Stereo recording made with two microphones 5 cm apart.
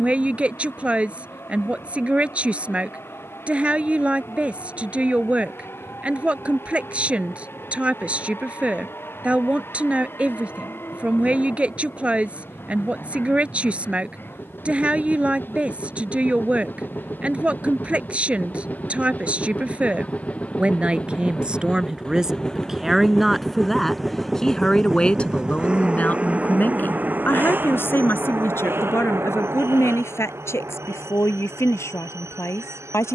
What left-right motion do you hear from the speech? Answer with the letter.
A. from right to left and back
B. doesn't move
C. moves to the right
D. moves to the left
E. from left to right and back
D.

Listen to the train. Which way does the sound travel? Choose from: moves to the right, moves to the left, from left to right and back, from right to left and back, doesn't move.
moves to the right.